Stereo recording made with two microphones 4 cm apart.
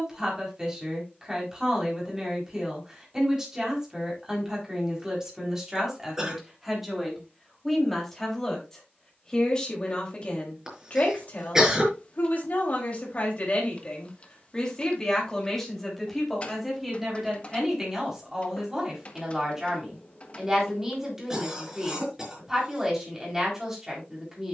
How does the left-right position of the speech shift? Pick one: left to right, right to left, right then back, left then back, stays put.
left then back.